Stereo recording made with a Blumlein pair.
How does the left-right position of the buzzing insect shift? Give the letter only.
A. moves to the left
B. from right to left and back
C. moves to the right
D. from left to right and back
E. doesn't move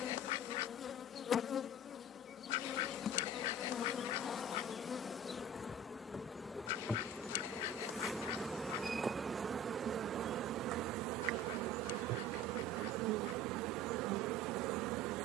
C.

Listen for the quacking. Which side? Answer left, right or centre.
left.